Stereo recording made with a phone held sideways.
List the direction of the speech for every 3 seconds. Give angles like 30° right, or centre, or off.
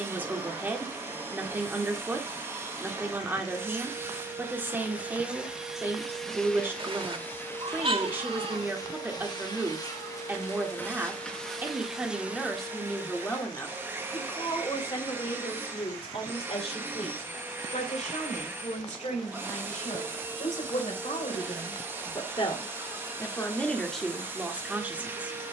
10° right, 10° right, 10° right, 10° right, 10° left, 50° left, 60° left, 30° left, 10° right.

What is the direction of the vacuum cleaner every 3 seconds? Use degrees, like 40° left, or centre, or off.
20° right, 10° right, 20° left, 20° left, 10° right, 20° right, 20° right, 20° right, 20° right.